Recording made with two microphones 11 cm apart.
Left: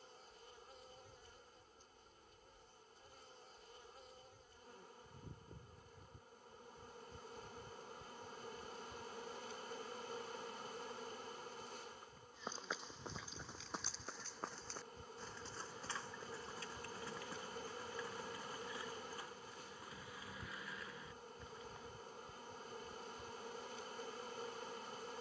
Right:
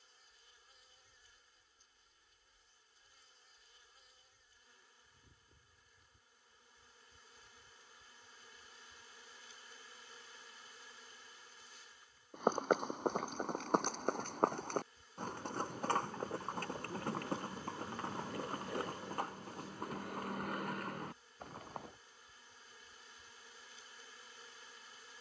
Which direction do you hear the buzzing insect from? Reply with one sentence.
You can hear the buzzing insect on the left.